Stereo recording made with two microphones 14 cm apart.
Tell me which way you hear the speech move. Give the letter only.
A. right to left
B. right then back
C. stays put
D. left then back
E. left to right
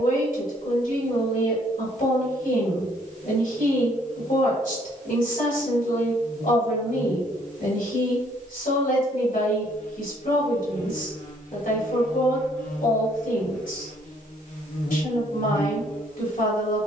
C.